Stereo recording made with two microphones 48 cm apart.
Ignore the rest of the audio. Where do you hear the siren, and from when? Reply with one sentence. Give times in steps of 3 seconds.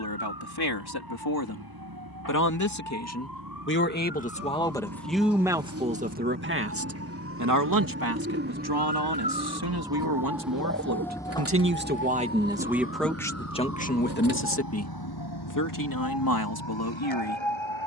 In this clip you hear the siren on the right from 0 s, in the centre from 9 s and on the left from 12 s.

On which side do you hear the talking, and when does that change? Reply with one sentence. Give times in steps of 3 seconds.
You can hear the talking on the left from 0 s, in the centre from 3 s, on the right from 6 s, in the centre from 12 s and on the left from 15 s.